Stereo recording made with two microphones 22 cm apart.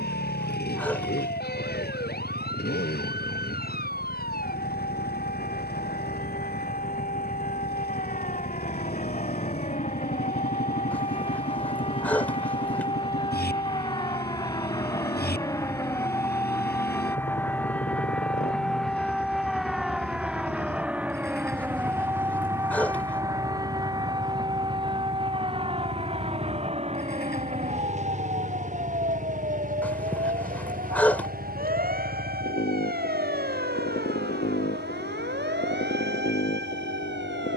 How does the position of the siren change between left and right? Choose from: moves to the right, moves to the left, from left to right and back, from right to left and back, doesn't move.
moves to the right.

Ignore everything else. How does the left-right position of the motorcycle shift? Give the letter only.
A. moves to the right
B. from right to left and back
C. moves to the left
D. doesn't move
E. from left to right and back
D.